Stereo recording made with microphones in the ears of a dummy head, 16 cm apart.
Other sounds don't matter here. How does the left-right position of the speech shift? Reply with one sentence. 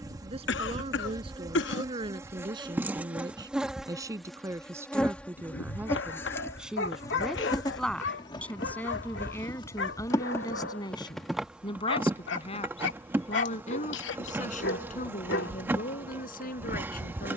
In this clip you hear the speech move from right to left.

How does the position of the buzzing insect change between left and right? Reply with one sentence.
In this clip you hear the buzzing insect go left and come back.